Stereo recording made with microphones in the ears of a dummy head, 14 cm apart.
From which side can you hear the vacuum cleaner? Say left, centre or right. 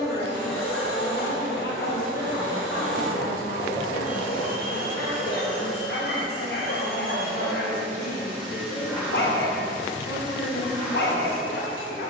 centre.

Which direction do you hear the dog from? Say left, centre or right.
left.